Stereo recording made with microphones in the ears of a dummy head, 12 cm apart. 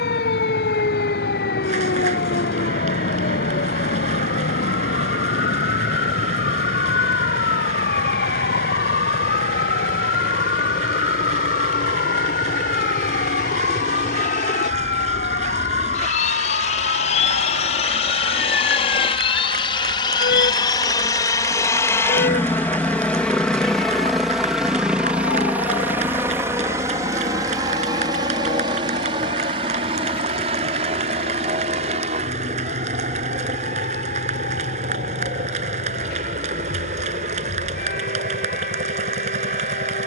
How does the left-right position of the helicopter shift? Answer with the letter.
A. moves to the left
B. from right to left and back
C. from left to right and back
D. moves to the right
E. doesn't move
D.